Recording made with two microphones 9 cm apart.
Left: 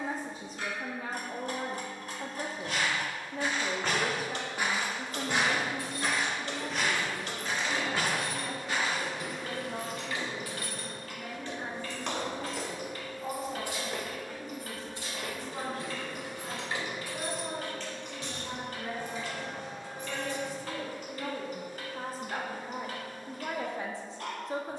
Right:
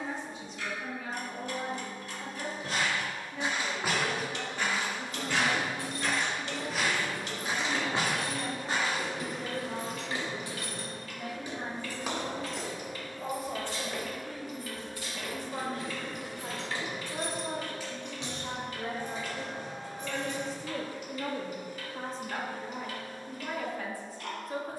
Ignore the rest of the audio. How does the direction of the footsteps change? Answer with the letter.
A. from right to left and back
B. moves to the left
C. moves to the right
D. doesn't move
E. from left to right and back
A.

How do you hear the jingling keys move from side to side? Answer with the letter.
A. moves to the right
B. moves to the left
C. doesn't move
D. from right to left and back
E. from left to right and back
D.